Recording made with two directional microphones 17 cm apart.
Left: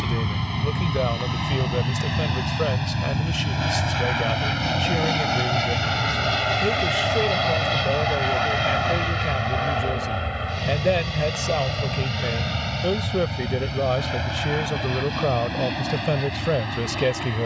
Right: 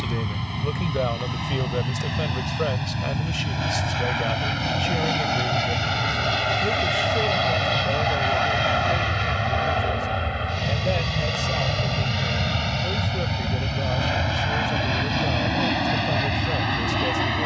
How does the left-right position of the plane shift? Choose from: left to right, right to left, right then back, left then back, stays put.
left to right.